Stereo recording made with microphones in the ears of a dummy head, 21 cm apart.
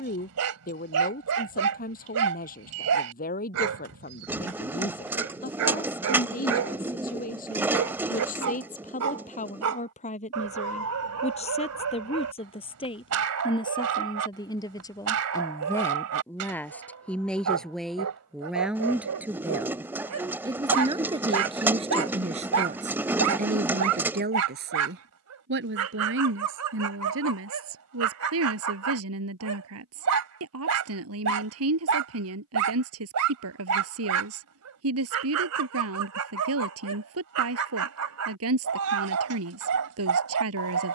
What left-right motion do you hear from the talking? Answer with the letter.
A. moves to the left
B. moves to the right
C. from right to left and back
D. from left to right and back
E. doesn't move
B.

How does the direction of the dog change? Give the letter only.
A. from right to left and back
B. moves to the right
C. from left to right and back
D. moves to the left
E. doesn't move
E.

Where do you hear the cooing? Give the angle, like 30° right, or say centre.
10° right.